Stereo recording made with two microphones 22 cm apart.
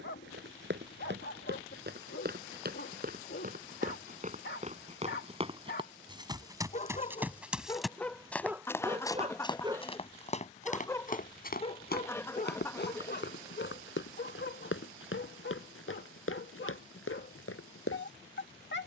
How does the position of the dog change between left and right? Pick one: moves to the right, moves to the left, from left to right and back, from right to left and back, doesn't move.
from left to right and back.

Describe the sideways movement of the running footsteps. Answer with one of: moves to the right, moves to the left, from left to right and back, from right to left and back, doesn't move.
moves to the left.